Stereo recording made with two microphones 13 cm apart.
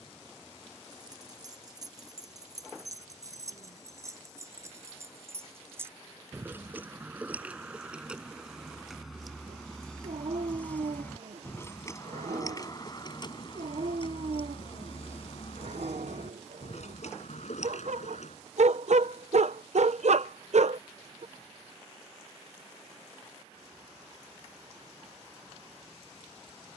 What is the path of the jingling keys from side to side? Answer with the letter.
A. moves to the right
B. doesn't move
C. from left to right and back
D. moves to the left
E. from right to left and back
D.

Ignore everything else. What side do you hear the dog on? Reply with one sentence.
You can hear the dog on the right.